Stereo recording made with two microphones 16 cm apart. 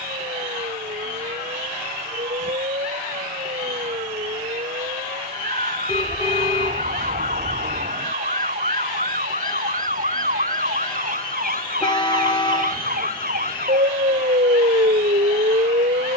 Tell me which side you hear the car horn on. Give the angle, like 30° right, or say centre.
30° left.